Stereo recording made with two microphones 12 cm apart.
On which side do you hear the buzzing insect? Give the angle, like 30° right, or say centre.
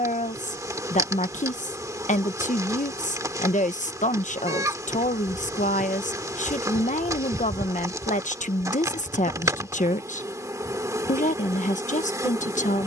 30° right.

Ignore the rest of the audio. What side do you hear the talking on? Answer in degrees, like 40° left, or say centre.
80° left.